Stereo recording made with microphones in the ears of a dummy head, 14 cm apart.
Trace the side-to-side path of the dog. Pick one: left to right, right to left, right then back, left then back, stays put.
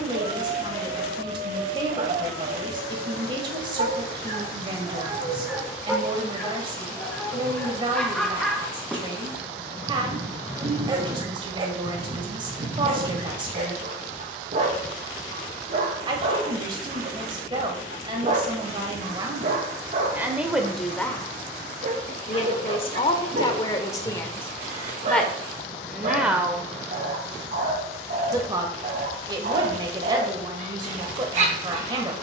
left then back.